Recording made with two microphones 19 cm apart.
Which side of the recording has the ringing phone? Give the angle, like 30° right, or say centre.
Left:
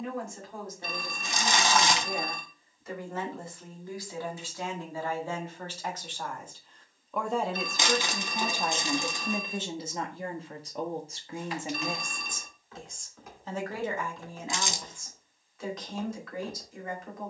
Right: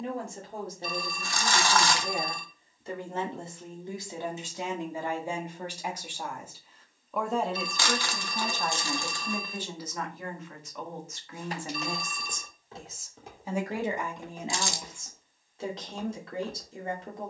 60° left.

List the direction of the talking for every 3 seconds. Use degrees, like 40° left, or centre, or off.
30° right, 20° right, centre, 30° left, 10° right, 30° right.